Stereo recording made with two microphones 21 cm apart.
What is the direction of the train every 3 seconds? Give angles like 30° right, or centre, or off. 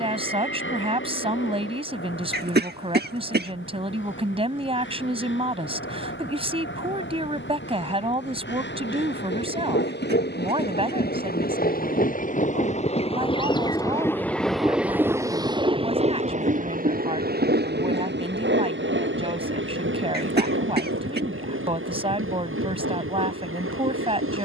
80° left, 70° left, 70° left, 60° left, 20° left, 40° right, 60° right, 70° right.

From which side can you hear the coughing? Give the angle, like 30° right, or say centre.
50° right.